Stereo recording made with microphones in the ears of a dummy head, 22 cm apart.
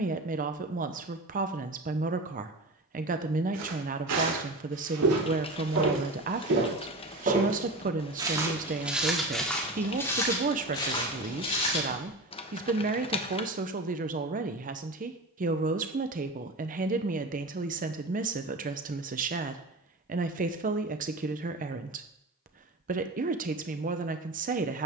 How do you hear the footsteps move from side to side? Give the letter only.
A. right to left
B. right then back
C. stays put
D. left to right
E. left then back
A.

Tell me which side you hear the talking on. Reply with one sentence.
You can hear the talking on the right.